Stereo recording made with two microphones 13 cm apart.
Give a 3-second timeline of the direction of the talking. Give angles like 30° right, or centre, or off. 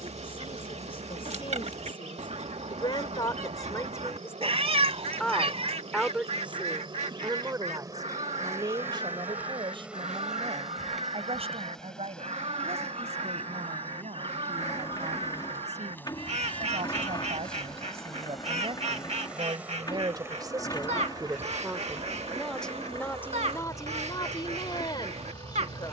40° left, 20° left, 20° right, 50° right, 60° right, 60° right, 40° right, centre, 30° left.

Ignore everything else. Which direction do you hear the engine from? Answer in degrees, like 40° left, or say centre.
30° left.